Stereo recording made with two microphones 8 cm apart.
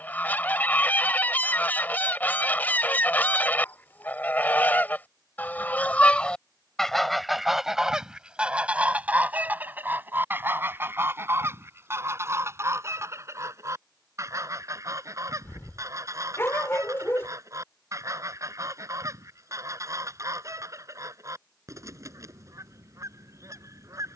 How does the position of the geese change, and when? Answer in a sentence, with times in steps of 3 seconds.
You can hear the geese on the left from 0 s, in the centre from 6 s and on the right from 9 s.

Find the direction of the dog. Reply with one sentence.
You can hear the dog on the left.